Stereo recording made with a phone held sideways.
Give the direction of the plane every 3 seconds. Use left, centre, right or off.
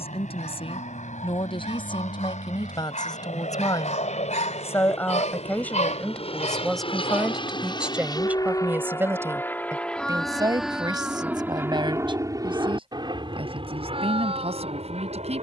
left, left, left, centre, right.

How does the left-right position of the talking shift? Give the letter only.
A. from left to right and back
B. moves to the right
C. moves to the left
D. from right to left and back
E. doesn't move
B.